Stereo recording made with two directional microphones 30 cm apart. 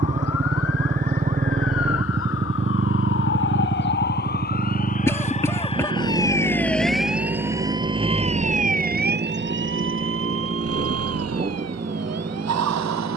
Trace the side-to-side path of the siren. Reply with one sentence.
You can hear the siren move to the right.